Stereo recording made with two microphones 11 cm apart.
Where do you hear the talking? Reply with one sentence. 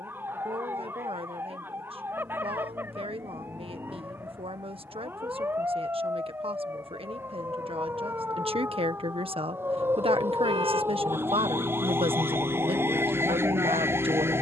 You can hear the talking on the right.